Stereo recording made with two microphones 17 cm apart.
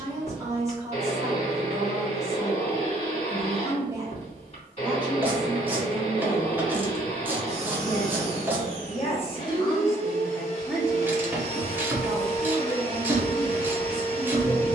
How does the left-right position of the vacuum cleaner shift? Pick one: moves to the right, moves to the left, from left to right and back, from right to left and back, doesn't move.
doesn't move.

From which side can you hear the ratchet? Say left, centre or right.
centre.